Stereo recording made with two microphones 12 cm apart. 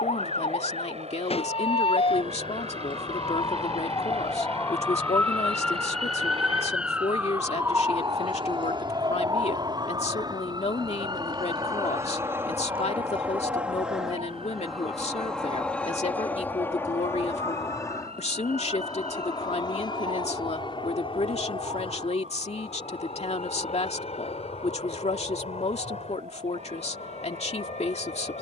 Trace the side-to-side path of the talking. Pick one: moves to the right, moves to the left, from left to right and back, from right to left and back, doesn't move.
doesn't move.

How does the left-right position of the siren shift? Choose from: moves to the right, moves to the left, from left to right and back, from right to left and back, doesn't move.
moves to the right.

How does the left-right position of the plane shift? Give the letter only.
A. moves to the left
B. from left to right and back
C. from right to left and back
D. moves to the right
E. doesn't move
A.